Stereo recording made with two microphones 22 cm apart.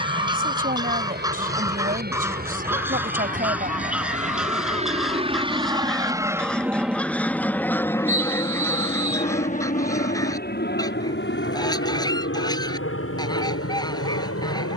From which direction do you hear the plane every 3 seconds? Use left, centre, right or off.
right, right, centre, left, left.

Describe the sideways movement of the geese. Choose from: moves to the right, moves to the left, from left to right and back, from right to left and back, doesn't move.
moves to the left.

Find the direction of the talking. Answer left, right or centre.
right.